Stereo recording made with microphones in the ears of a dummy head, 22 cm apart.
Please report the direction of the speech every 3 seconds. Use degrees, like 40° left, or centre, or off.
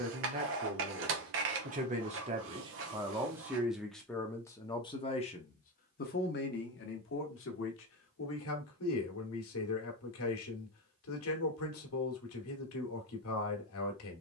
30° right, 10° left, 50° left, 60° left, 60° left.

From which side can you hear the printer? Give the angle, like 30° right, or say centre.
50° right.